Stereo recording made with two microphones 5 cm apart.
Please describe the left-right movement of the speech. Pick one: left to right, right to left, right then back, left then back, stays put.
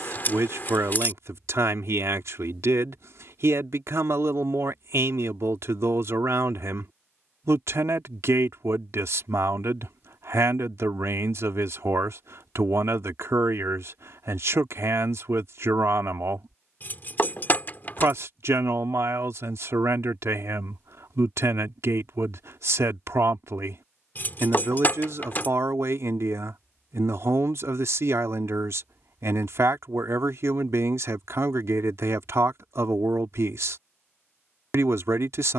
stays put.